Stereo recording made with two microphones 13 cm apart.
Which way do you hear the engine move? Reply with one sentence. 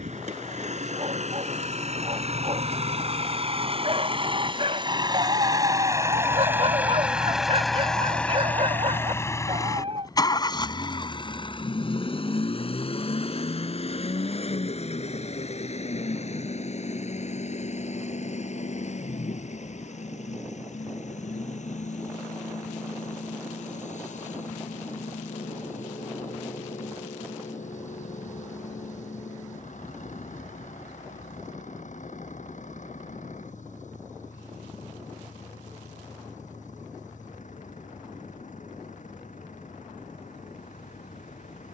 You can hear the engine move to the left.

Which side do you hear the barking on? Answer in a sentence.
In this clip you hear the barking on the right.